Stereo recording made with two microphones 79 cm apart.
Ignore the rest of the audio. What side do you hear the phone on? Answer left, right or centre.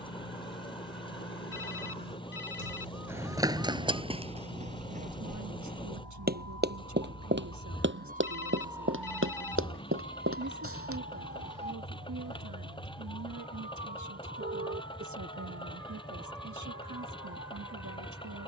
left.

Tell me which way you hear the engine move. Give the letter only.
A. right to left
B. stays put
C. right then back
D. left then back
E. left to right
B.